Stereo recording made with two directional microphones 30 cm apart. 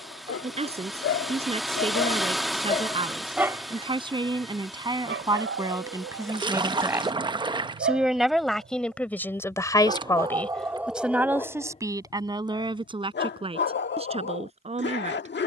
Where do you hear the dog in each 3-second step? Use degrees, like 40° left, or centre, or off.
40° left, 30° right, 40° right, 10° right, 40° left.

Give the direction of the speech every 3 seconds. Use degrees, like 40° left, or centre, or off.
20° right, 10° right, centre, centre, 20° right.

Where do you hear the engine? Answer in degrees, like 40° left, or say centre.
centre.